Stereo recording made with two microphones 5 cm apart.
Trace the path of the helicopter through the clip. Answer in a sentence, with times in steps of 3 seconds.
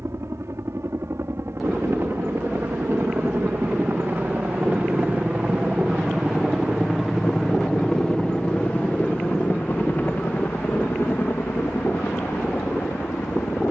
In this clip you hear the helicopter on the right from 0 s, in the centre from 6 s and on the left from 9 s.